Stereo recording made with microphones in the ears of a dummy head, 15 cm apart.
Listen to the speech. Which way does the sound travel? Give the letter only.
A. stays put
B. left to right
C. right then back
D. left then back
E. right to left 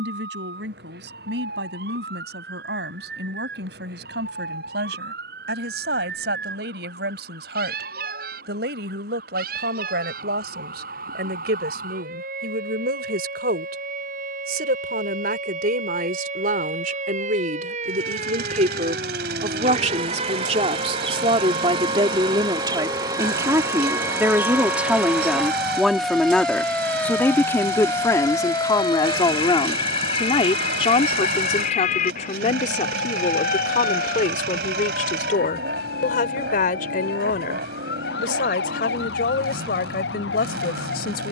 E.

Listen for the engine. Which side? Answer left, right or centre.
right.